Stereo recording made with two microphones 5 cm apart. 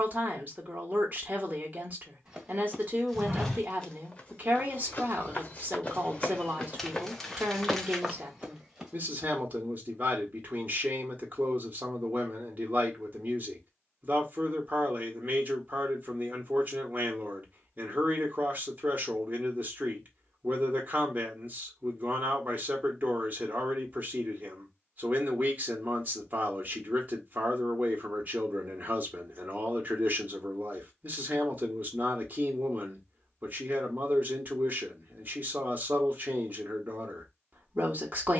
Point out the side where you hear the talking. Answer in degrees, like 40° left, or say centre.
40° right.